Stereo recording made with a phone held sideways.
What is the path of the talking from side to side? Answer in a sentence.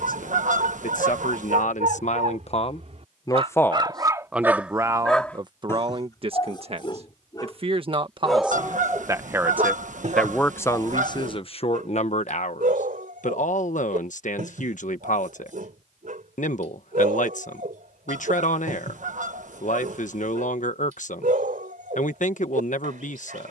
In this clip you hear the talking move from left to right and back again.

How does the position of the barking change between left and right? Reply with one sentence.
You can hear the barking go left and come back.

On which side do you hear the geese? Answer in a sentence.
You can hear the geese on the right.